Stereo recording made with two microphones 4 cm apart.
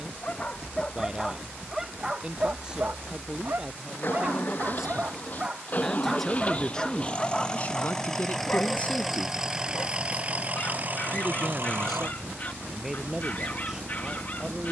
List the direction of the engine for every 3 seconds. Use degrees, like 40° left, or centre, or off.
50° left, 40° left, 20° left, 30° right, 60° right.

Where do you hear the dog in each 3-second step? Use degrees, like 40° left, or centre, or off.
10° right, 40° right, 20° left, 40° left, 40° left.